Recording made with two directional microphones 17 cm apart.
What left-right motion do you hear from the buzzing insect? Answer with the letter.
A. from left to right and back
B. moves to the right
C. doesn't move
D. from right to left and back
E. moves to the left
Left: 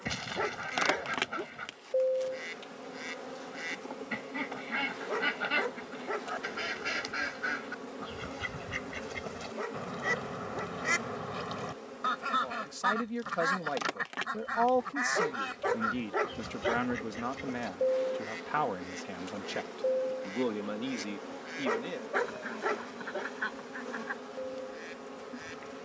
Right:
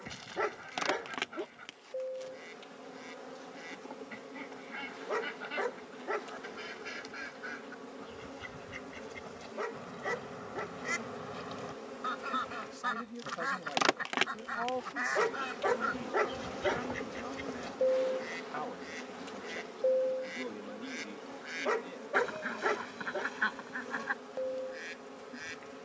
A.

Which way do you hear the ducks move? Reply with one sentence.
In this clip you hear the ducks move from left to right.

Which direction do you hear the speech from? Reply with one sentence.
In this clip you hear the speech on the left.